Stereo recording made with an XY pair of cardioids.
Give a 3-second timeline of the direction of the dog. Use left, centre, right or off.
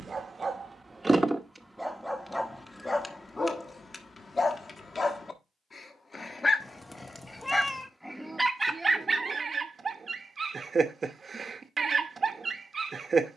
centre, left, centre, right, right.